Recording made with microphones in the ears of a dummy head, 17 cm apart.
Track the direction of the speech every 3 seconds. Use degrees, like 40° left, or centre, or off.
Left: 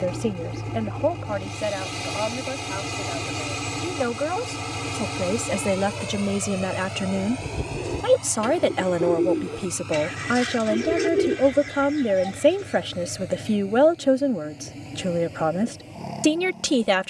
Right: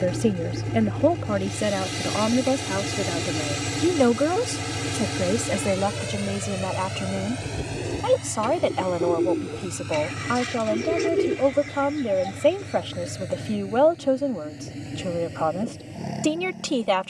40° right, 30° right, 20° left, 20° left, 20° left, 20° left.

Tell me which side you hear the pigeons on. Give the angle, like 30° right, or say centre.
10° left.